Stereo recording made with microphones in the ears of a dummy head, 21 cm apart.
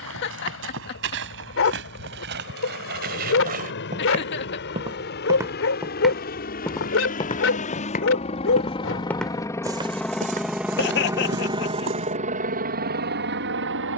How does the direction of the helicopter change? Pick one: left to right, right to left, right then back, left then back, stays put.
left to right.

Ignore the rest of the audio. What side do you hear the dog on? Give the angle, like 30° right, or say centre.
60° left.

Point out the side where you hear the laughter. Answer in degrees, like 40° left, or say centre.
50° left.